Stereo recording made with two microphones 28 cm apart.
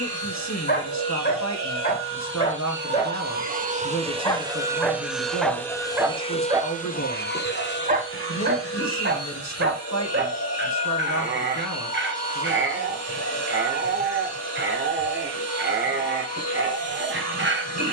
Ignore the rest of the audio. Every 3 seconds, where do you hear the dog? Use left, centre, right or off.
left, centre, right, right, right, right.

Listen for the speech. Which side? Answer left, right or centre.
left.